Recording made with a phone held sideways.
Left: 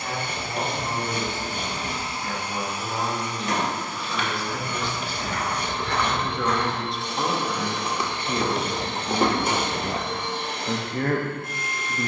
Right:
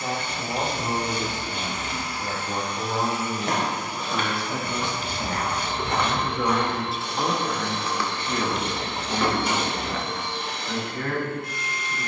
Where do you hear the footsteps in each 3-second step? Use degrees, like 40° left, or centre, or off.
off, 40° right, 10° left, 50° left.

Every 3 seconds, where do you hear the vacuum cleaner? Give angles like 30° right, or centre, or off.
40° left, 20° right, centre, 50° left.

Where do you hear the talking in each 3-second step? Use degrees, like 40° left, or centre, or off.
40° right, 20° right, centre, 40° left.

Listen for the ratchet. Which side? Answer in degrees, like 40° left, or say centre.
60° left.